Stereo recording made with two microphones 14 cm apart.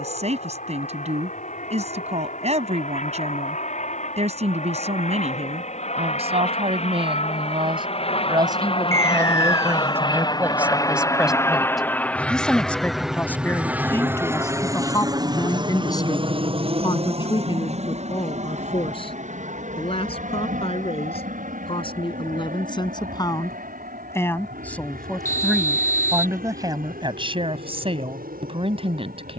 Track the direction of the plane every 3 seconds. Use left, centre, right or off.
left, left, left, left, centre, right, right, right, right, right.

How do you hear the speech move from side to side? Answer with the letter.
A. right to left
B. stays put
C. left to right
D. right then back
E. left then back
E.